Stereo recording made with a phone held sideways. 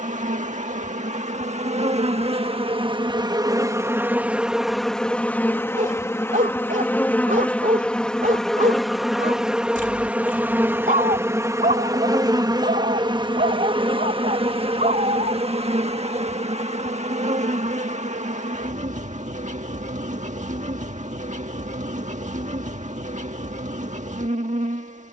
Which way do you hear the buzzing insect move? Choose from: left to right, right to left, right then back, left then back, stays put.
left then back.